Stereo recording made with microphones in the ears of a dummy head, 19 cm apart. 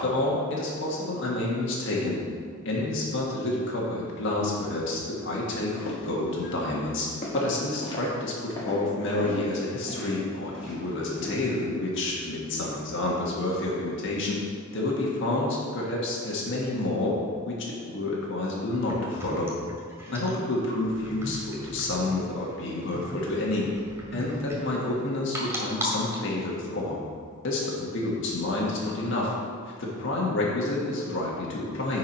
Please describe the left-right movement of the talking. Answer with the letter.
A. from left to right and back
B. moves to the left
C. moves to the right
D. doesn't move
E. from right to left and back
D.